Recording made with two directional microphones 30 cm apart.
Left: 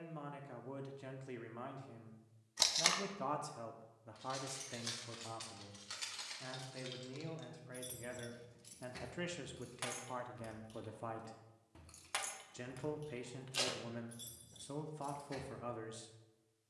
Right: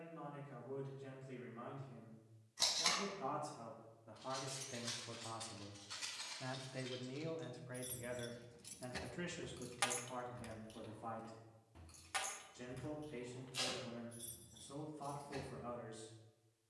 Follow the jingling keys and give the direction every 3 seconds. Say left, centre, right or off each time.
off, left, left, centre, left, left.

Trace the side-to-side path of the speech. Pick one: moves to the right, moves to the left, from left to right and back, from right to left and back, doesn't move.
from left to right and back.